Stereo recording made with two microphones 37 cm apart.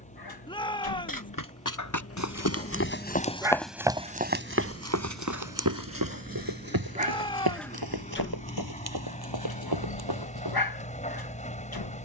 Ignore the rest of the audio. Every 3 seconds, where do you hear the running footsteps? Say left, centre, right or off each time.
left, right, right, right.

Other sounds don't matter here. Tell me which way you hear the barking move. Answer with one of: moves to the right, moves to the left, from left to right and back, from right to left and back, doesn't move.
from left to right and back.